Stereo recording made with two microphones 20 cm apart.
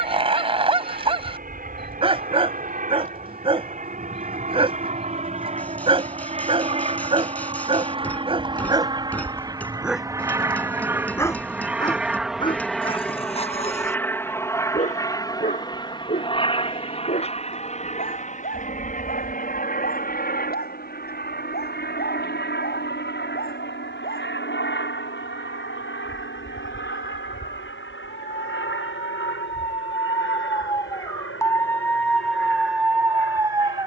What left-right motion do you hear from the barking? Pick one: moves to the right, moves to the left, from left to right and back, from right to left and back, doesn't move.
from right to left and back.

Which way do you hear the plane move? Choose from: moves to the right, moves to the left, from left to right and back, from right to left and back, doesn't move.
moves to the left.